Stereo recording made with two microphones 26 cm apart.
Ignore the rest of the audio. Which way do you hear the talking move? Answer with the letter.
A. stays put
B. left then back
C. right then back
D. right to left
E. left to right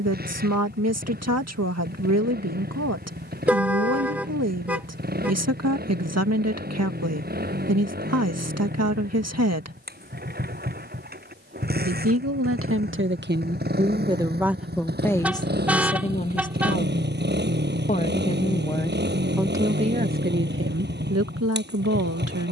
B.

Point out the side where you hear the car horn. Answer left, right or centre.
centre.